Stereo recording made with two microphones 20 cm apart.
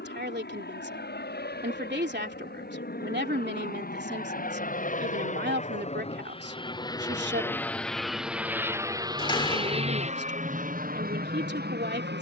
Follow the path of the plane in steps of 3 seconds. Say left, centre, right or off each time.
left, left, centre, right.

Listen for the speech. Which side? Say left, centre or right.
right.